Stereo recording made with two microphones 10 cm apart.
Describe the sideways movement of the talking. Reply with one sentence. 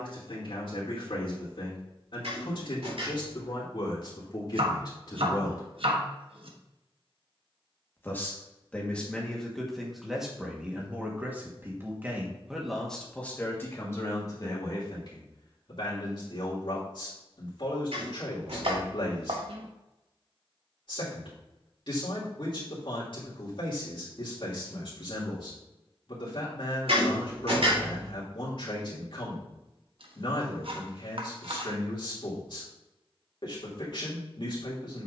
You can hear the talking move from left to right and back again.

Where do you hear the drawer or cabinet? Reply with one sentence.
In this clip you hear the drawer or cabinet on the right.